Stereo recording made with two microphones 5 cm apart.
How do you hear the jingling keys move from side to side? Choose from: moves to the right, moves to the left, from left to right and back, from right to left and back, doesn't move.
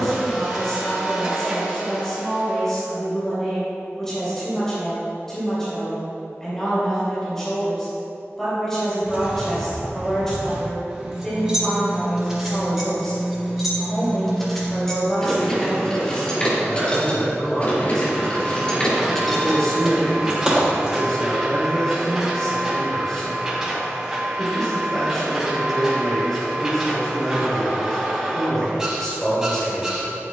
from right to left and back.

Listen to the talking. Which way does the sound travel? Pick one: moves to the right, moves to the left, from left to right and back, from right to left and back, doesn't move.
doesn't move.